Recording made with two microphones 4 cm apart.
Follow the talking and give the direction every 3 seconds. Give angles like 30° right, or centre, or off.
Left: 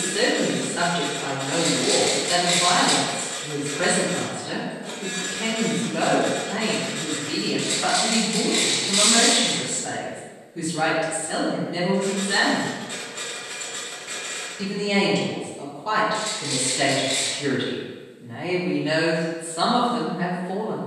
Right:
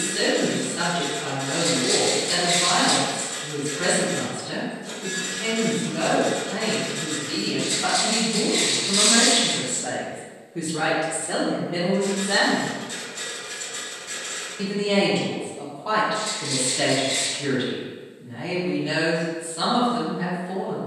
30° left, 30° left, 20° left, 50° right, 40° right, centre, 20° left.